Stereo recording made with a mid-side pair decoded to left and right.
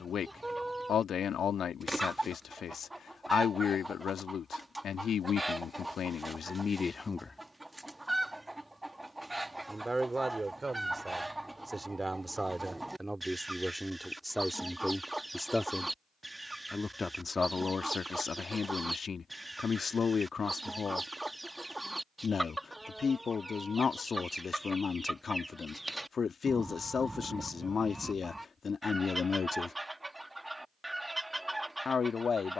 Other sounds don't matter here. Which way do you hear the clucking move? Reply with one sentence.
In this clip you hear the clucking stay in one place.